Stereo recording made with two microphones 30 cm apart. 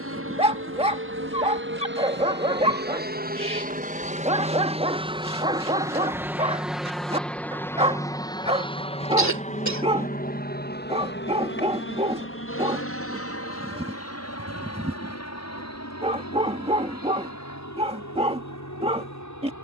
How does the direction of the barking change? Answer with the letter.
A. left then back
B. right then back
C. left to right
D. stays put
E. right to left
D.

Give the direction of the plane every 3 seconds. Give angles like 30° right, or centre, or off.
40° right, 20° right, 10° left, 30° left, 50° left, 60° left, 60° left.